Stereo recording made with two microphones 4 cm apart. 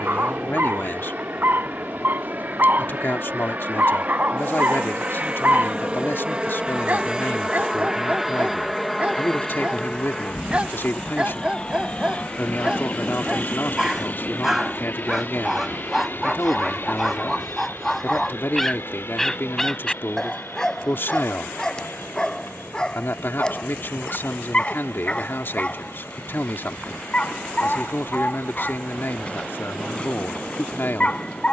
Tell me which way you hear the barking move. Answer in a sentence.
You can hear the barking move to the left.